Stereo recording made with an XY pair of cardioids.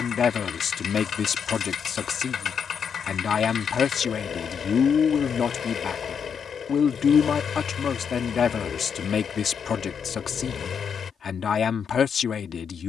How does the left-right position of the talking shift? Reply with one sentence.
In this clip you hear the talking stay in one place.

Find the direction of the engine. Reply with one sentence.
In this clip you hear the engine on the left.